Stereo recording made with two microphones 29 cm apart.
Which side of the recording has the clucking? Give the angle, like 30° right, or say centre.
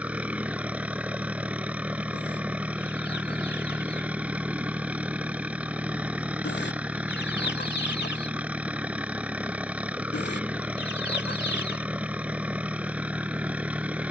40° left.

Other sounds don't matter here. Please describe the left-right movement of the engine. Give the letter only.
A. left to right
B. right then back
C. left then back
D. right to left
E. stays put
E.